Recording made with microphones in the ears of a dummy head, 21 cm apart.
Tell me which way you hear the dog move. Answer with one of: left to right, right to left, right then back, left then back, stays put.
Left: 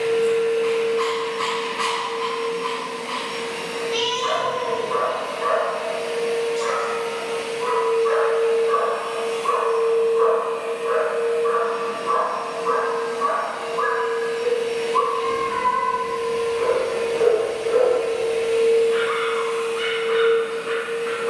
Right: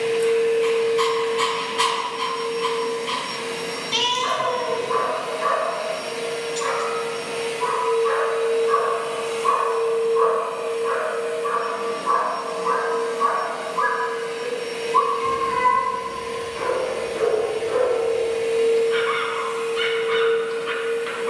stays put.